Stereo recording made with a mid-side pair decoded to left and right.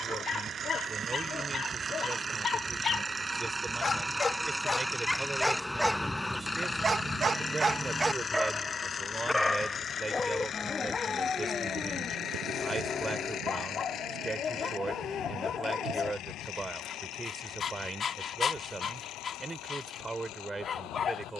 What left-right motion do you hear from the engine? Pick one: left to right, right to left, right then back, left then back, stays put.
right to left.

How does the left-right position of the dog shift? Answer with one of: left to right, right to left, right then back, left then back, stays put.
right then back.